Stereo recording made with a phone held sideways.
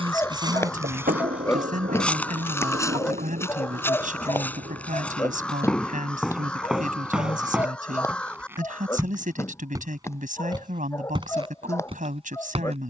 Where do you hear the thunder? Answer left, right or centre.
right.